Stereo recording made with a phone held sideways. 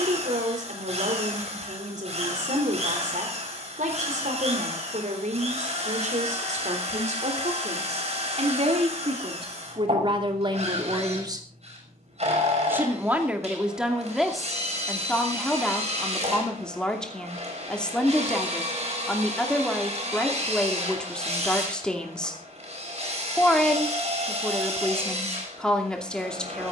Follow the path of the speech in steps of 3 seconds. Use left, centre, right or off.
right, right, right, right, centre, centre, centre, centre, centre.